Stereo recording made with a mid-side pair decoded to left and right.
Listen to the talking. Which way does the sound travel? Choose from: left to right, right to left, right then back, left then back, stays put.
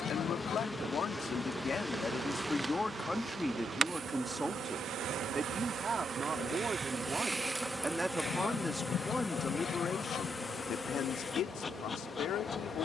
right then back.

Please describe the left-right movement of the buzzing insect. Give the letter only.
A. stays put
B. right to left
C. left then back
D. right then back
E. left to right
D.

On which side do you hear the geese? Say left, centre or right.
left.